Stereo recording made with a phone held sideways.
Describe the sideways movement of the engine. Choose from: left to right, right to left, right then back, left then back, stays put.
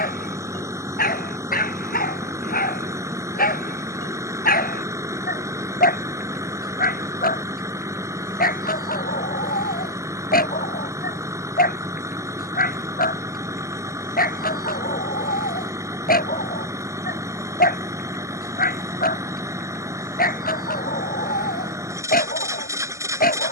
stays put.